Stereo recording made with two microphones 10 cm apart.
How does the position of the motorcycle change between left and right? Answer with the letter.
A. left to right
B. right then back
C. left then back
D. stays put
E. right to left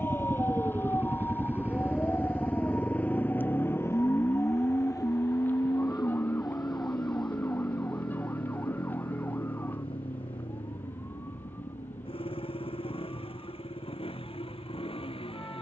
E.